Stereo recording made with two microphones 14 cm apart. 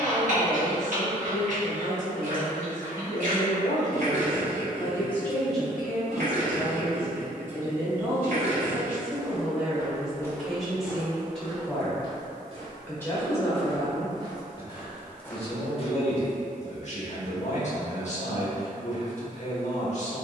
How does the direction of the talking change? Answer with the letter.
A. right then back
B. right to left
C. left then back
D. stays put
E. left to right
A.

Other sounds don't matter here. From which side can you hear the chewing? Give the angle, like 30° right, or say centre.
60° right.